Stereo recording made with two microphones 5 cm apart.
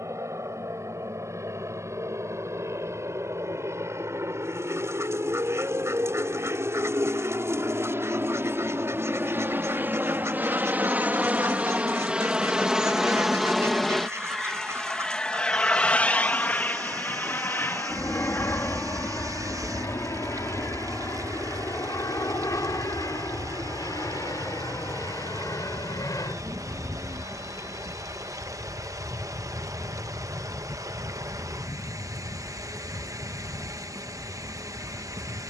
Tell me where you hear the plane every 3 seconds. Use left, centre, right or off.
right, right, right, right, centre, left, left, left, left, left, left, left.